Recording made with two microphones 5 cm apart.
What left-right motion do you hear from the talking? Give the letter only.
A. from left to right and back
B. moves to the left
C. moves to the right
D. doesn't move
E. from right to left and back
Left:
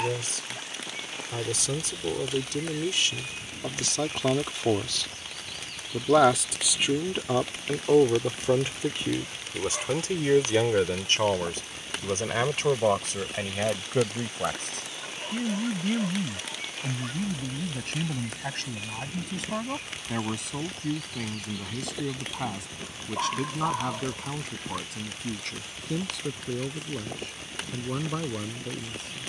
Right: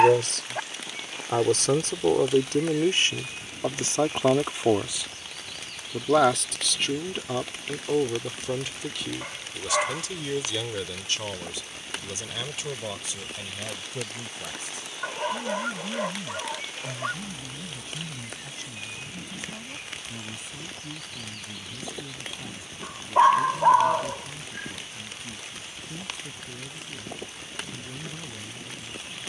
B.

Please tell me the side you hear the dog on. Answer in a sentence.
You can hear the dog on the right.